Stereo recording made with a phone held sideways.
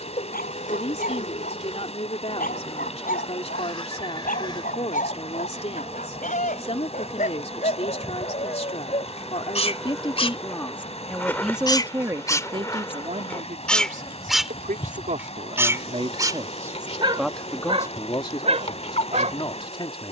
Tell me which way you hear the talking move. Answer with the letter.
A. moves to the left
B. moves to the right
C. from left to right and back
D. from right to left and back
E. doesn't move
C.